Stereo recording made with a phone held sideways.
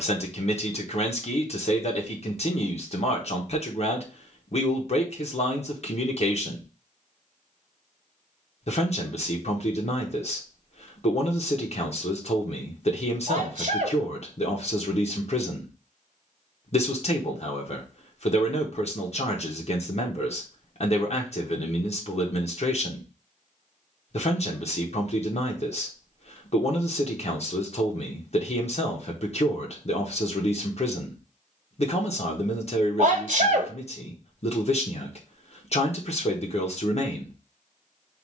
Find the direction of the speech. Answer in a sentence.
You can hear the speech on the left.